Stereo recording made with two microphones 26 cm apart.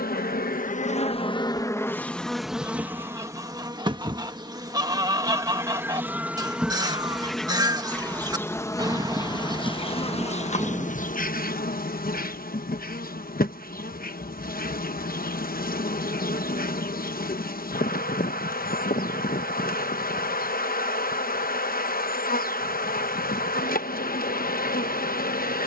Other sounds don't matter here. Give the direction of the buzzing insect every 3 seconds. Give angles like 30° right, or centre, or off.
20° left, 10° right, centre, 30° left, 40° left, 40° left, 40° left, 40° left, 40° left.